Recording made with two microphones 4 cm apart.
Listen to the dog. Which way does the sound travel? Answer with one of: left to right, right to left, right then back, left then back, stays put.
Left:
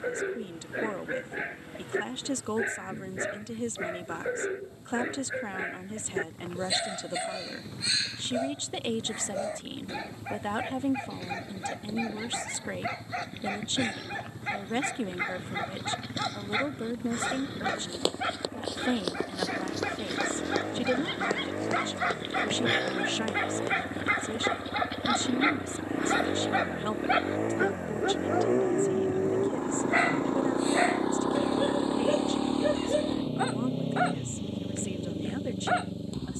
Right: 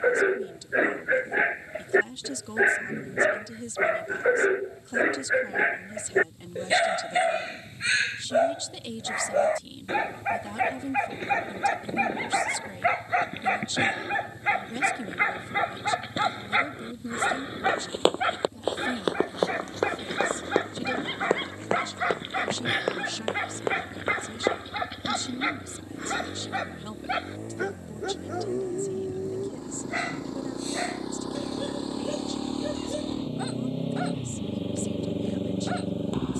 right to left.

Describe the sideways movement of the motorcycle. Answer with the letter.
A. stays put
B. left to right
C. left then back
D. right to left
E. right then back
B.